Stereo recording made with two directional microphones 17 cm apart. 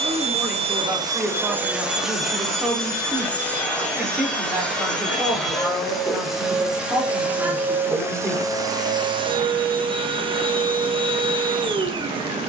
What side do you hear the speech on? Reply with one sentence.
You can hear the speech in the centre.